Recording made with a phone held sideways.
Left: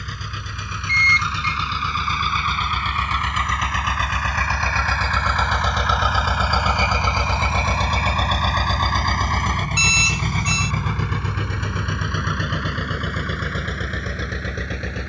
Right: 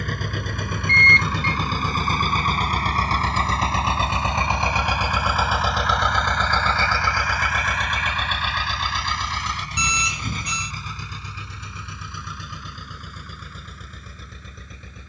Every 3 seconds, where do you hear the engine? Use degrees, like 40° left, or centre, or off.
50° right, 20° right, 30° left, 60° left, 70° left.